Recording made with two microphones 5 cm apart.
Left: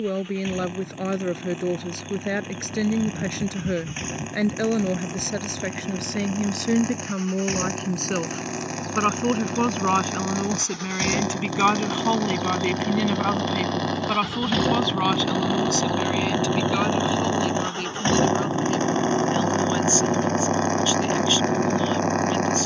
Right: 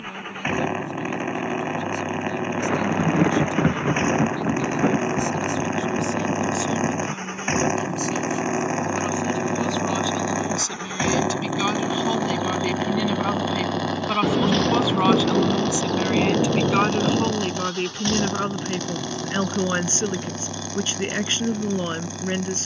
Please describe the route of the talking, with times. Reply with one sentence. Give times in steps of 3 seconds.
You can hear the talking on the left from 0 s, in the centre from 12 s and on the right from 15 s.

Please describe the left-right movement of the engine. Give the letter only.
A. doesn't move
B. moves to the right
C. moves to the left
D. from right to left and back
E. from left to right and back
C.